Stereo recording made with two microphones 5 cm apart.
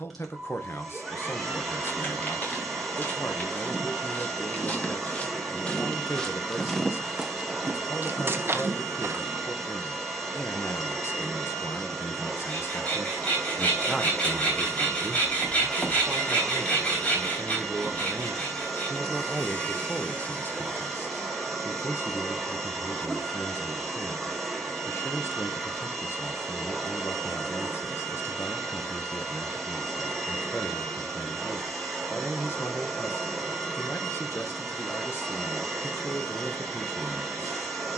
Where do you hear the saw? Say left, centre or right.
left.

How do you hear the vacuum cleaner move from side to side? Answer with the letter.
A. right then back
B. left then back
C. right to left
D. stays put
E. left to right
D.